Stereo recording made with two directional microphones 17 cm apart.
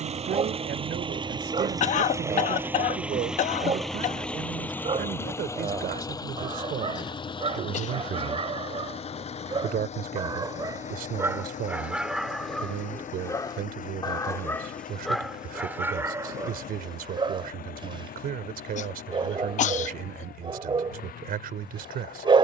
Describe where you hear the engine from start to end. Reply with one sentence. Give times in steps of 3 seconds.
In this clip you hear the engine on the right from 0 s, in the centre from 3 s and on the left from 6 s.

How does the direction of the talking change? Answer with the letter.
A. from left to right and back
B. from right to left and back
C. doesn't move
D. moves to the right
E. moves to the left
C.